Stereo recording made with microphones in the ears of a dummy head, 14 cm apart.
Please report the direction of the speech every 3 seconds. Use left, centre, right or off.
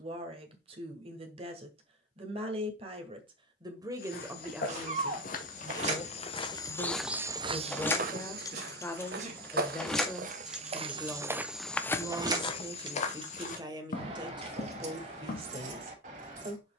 right, centre, left, centre, right, right.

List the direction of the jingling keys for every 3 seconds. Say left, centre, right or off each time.
off, right, centre, centre, right, right.